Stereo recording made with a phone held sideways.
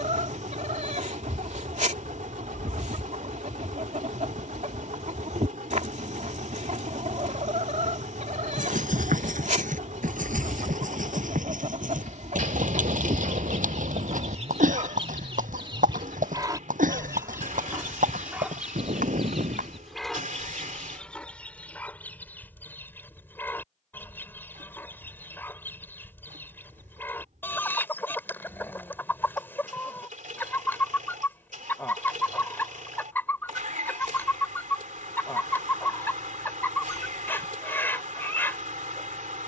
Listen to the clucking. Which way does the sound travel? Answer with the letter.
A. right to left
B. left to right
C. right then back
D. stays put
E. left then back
A.